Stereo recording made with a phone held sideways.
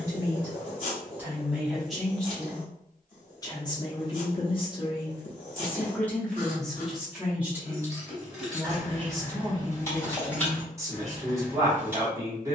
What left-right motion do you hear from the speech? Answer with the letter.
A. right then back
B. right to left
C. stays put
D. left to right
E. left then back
E.